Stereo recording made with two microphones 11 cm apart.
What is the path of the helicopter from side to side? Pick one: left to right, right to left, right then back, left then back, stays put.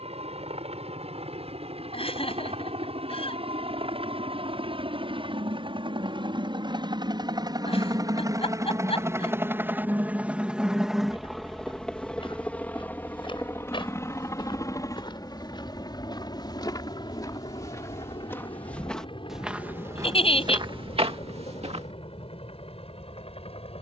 right to left.